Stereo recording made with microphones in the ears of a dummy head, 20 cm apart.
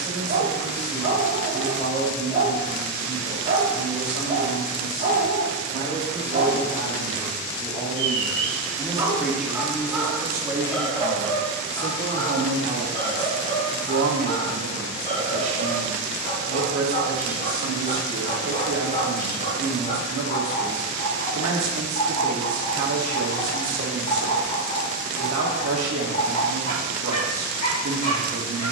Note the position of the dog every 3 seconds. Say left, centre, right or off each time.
right, right, right, centre, left, left, left, left, left, left.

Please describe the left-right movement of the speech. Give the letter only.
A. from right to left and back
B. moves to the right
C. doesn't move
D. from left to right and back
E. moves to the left
B.